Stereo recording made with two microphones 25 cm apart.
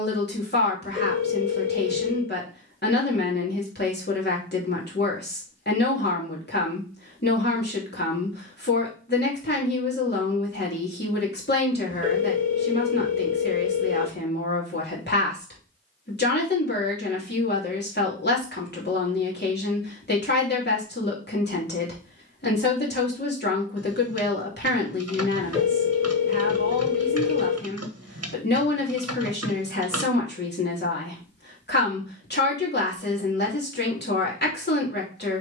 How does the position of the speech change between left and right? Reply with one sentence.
In this clip you hear the speech stay put.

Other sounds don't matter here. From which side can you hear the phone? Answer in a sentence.
In this clip you hear the phone on the left.